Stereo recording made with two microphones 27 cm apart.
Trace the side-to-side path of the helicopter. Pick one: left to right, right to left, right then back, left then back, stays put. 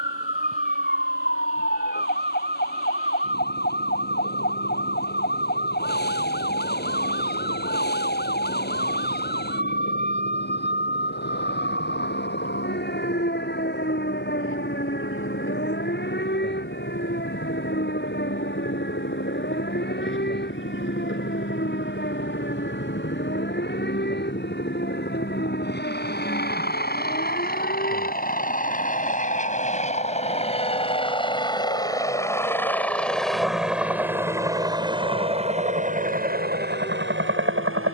left to right.